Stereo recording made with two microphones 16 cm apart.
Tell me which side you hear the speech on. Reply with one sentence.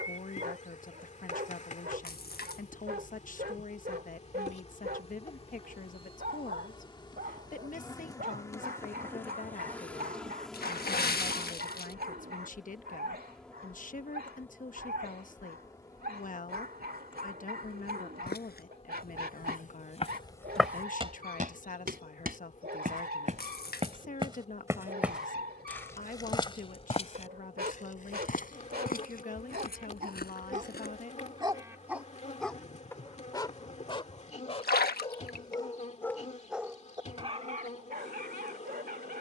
You can hear the speech on the left.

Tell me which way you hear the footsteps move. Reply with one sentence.
In this clip you hear the footsteps move from left to right and back again.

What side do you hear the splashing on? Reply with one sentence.
You can hear the splashing on the left.